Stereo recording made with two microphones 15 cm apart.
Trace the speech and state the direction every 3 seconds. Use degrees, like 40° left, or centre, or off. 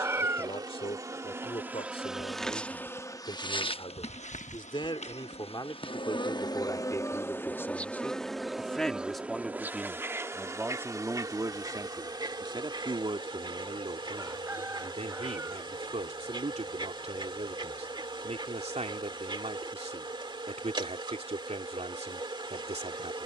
40° left, 30° left, 20° left, 10° right, 40° right, 50° right, 50° right, 50° right.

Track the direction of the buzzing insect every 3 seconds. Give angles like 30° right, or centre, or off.
10° right, 40° left, 10° left, 20° right, 30° right, 30° right, 30° right, 30° right.